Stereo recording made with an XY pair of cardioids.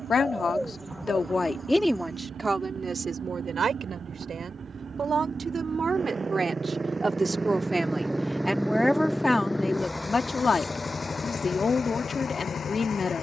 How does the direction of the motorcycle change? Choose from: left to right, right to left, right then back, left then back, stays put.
right to left.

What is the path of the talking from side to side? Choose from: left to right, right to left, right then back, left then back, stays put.
right then back.